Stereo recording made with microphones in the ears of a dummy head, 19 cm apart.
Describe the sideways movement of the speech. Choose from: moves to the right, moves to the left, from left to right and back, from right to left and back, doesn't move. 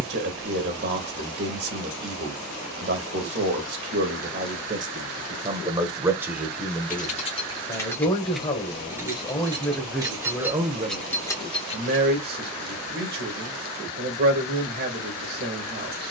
from right to left and back.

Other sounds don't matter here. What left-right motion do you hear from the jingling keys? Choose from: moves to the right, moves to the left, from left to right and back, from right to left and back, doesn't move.
from left to right and back.